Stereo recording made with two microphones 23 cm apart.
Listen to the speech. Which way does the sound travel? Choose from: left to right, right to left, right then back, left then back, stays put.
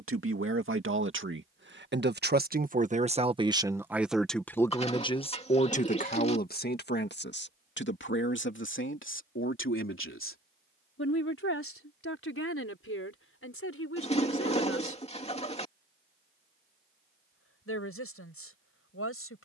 right to left.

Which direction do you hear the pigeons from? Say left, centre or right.
left.